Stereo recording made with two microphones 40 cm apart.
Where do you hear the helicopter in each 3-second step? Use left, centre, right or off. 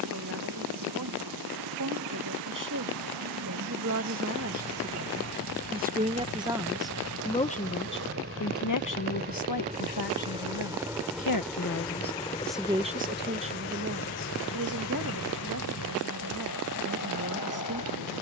right, right, right, centre, left, left.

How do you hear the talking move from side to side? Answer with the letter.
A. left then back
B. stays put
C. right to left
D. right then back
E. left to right
A.